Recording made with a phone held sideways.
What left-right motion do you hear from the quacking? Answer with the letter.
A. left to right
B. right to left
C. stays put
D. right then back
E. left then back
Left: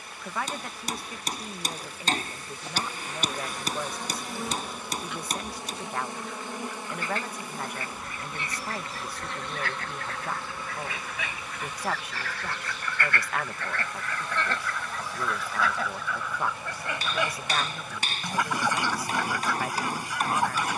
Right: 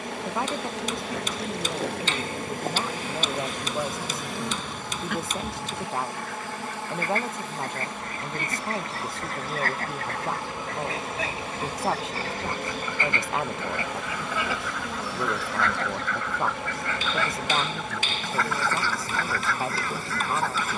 B.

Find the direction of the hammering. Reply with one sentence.
You can hear the hammering on the left.